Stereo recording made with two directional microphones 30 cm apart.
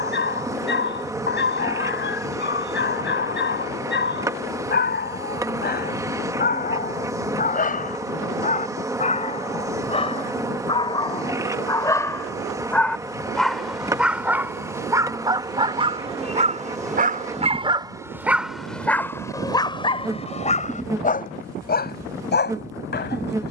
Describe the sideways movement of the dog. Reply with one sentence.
In this clip you hear the dog move from left to right and back again.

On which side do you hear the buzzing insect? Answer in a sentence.
You can hear the buzzing insect in the centre.